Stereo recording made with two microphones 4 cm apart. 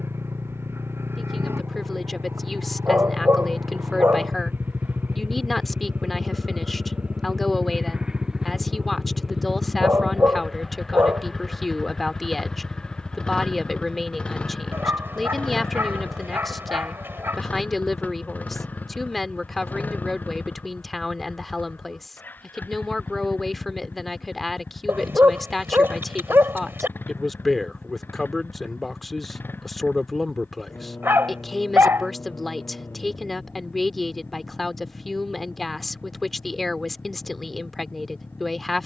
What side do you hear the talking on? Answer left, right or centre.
centre.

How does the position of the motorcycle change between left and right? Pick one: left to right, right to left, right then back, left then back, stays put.
right to left.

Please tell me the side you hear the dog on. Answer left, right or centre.
right.